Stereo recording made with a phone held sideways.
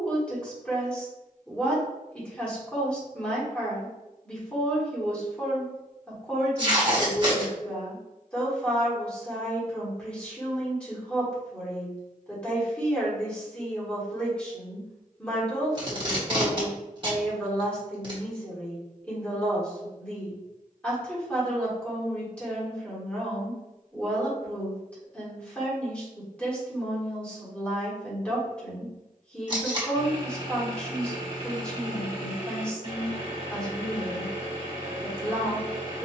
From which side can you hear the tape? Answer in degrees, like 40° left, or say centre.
30° right.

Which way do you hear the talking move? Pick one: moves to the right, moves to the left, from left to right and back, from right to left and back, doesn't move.
doesn't move.